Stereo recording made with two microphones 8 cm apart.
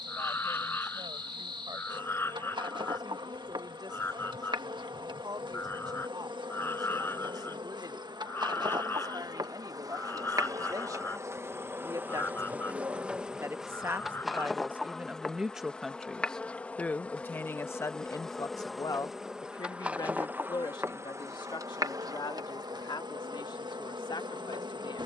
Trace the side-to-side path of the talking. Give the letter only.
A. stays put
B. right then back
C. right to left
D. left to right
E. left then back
C.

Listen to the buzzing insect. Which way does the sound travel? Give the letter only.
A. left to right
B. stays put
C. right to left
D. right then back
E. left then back
E.